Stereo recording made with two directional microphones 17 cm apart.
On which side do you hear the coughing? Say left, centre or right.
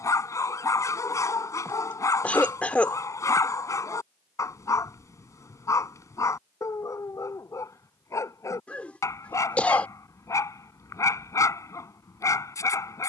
centre.